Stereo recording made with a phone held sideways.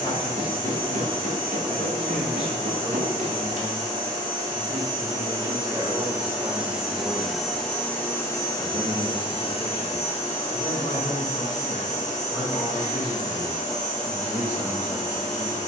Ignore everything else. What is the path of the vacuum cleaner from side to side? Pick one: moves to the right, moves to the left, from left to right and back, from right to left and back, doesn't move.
moves to the left.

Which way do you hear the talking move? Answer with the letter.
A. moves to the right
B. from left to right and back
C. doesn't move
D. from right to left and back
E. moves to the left
B.